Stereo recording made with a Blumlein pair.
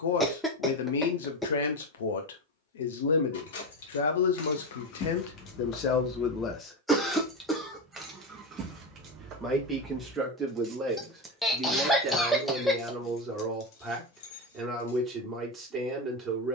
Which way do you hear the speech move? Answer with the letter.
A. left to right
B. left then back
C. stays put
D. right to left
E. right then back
A.